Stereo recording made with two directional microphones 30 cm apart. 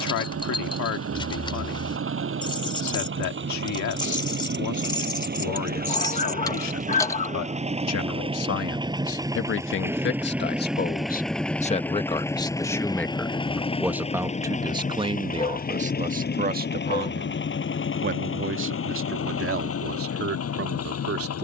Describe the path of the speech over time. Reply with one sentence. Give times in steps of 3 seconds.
You can hear the speech on the left from 0 s, in the centre from 12 s and on the right from 15 s.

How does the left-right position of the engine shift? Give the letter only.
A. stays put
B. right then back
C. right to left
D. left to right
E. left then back
C.